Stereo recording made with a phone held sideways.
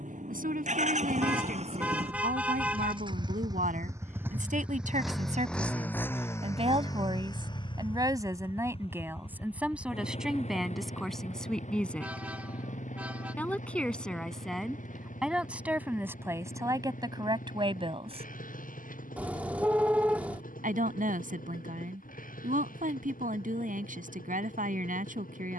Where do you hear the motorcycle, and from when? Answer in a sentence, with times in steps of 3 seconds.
In this clip you hear the motorcycle on the right from 0 s, in the centre from 3 s and on the left from 6 s.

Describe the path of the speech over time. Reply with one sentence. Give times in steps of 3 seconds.
In this clip you hear the speech on the right from 0 s, in the centre from 9 s and on the right from 15 s.